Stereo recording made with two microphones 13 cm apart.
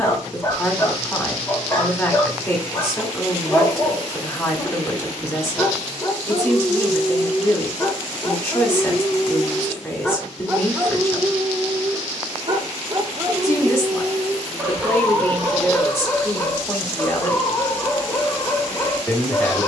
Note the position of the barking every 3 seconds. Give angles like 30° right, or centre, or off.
20° left, 20° left, 20° left, 10° right, 20° right, 10° left, 20° left.